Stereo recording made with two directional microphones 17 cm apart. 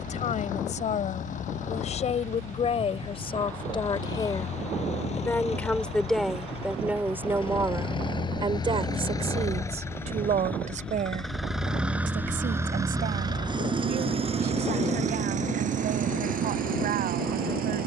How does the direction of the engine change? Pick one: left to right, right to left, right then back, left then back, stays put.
left to right.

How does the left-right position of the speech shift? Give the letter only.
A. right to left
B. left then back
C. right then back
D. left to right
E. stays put
D.